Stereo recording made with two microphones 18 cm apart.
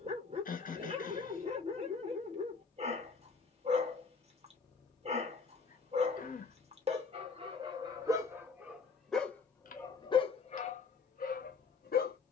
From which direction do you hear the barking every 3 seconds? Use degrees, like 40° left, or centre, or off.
30° right, 30° right, 20° right, 30° left.